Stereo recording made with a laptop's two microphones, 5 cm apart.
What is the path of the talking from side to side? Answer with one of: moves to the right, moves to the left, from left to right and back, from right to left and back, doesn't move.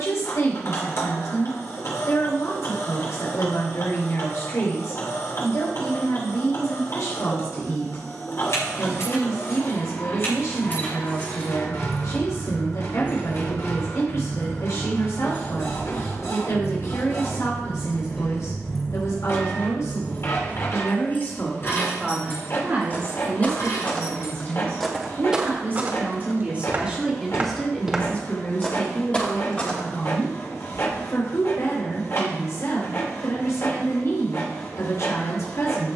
from left to right and back.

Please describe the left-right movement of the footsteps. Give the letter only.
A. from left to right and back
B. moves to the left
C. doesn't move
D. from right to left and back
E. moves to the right
A.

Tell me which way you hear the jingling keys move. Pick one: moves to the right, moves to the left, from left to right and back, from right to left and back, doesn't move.
from left to right and back.